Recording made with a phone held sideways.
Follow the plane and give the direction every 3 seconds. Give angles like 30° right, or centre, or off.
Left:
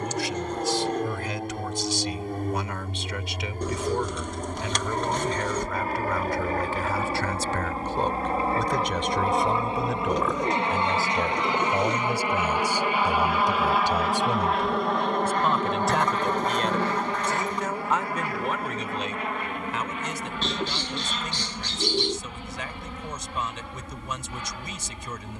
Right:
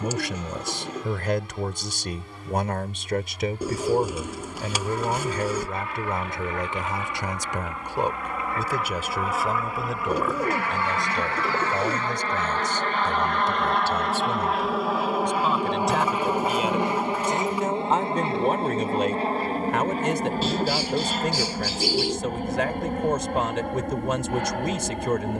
50° left, 50° left, 40° left, 20° left, 10° left, 10° right, 30° right, 50° right, 50° right.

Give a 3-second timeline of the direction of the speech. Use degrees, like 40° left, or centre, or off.
60° right, 40° right, 20° right, centre, 10° left, 10° right, 50° right, 70° right, 70° right.